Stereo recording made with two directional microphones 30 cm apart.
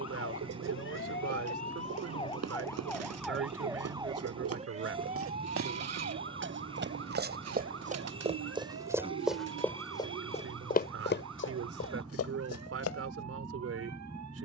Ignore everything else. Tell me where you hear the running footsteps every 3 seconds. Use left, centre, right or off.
right, right, right, left, left.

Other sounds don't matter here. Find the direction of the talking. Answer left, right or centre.
right.